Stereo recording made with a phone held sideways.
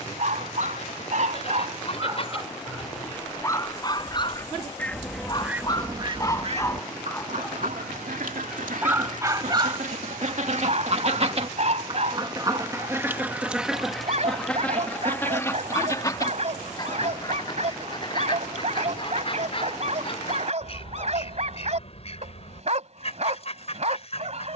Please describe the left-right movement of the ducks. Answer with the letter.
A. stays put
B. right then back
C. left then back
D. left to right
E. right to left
B.